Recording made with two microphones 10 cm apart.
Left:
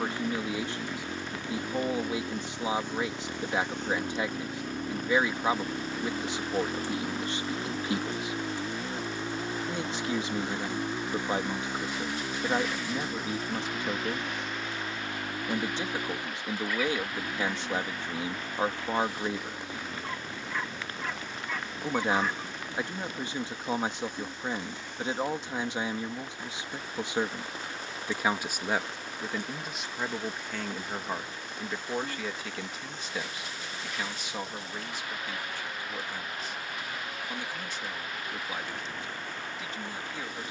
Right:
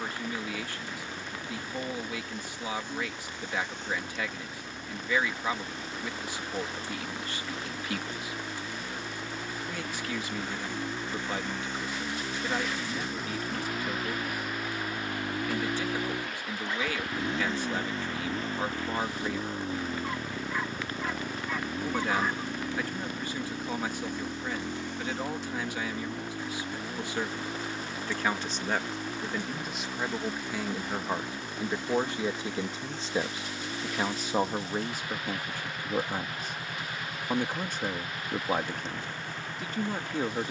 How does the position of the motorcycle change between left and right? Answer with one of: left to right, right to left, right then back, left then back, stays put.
left to right.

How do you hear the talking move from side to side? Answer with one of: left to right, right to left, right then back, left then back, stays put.
left to right.